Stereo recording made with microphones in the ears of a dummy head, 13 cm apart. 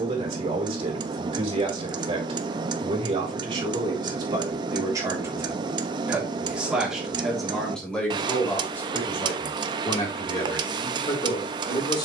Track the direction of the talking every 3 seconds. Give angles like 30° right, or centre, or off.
40° right, 30° right, centre, 30° left.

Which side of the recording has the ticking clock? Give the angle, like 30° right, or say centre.
30° right.